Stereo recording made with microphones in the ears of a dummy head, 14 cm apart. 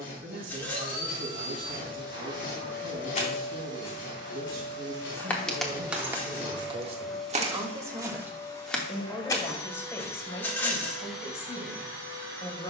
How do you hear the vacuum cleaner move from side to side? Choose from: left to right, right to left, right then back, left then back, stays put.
left then back.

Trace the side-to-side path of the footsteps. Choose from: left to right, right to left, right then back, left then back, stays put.
right then back.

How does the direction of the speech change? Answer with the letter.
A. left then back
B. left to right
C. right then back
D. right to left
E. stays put
D.